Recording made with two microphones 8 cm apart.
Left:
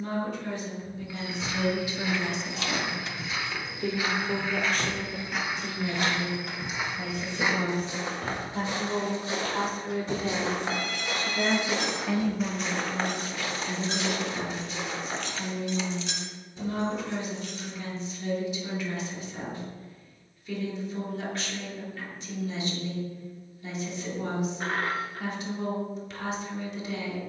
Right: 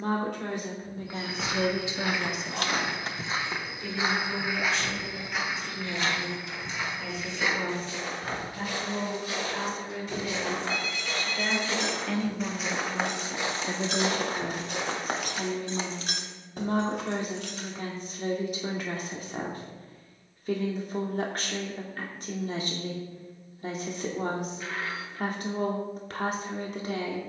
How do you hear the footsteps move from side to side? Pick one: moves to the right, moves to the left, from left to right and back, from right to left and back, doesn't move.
from right to left and back.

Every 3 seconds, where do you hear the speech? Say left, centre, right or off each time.
right, left, left, left, right, right, right, right, right.